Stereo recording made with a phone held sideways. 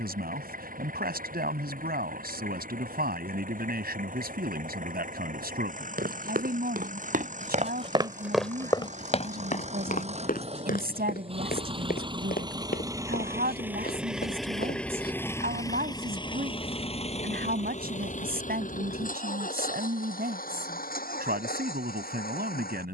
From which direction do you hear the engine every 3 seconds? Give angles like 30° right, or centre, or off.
70° right, 60° right, 60° right, 40° right, 10° right, 30° left, 60° left, 80° left.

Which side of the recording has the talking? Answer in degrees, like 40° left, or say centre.
80° right.